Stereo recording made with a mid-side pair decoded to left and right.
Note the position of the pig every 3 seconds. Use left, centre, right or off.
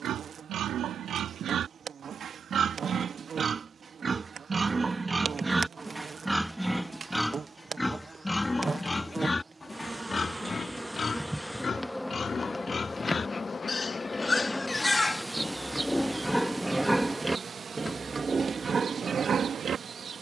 right, right, centre, left, left, centre, right.